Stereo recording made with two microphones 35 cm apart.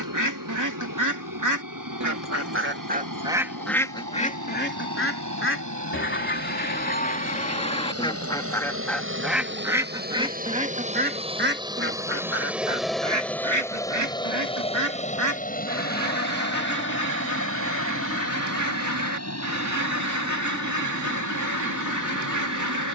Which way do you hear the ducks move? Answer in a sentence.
In this clip you hear the ducks go left and come back.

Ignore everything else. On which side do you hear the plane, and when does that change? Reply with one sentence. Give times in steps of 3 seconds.
You can hear the plane on the right from 0 s, in the centre from 12 s and on the left from 15 s.